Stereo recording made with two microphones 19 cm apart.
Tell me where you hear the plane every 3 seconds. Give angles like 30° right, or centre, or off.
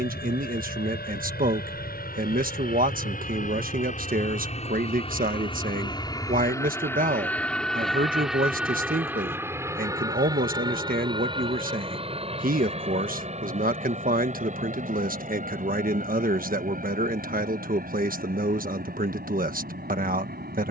60° left, 40° left, 10° left, 20° right, 30° right, 40° right, 50° right.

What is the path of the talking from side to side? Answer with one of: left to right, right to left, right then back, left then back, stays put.
stays put.